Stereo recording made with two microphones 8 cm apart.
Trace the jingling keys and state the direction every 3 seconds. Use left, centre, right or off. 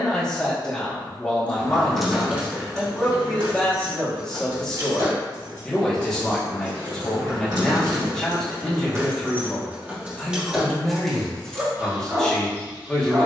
centre, right, right, centre, off.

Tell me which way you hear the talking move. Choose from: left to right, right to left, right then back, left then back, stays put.
stays put.